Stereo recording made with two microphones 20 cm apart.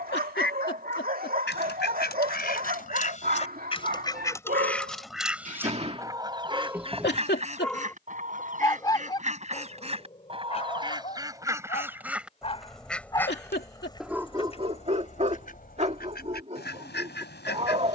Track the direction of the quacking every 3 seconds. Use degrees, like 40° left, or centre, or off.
50° left, 10° left, 30° right, 30° right, 10° left, 50° left.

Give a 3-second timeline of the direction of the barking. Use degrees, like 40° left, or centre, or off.
50° right, 40° right, centre, 30° left, centre, 30° right.